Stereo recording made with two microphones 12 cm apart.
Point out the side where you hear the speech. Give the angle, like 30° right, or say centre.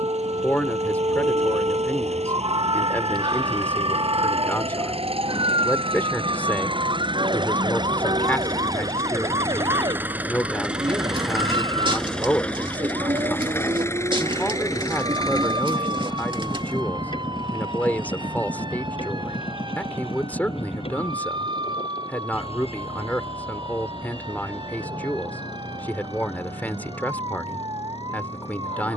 10° left.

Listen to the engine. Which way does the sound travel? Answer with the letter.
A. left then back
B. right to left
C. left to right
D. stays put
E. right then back
B.